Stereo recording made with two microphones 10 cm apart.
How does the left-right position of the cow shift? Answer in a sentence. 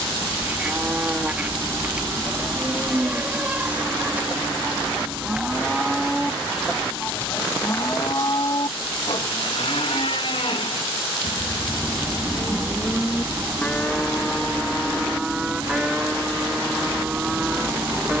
You can hear the cow move from right to left and back again.